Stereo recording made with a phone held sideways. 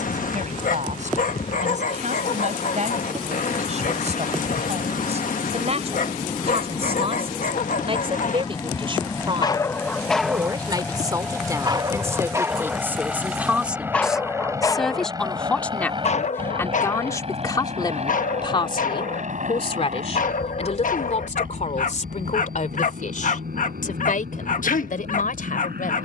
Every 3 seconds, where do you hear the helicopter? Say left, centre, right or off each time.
left, left, left, centre, centre, right, right, right, right.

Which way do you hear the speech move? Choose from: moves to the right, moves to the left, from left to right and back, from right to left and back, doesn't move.
moves to the left.